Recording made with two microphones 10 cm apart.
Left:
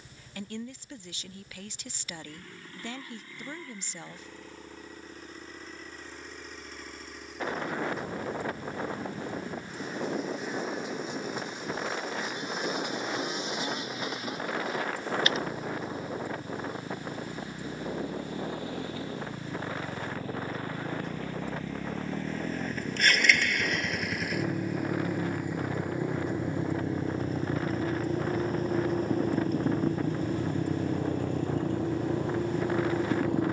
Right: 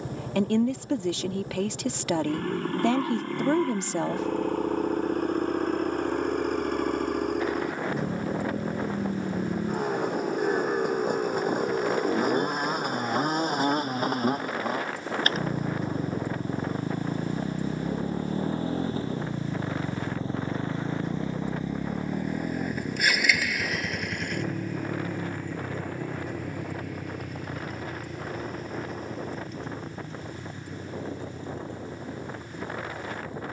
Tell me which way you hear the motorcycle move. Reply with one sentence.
You can hear the motorcycle travel towards the left.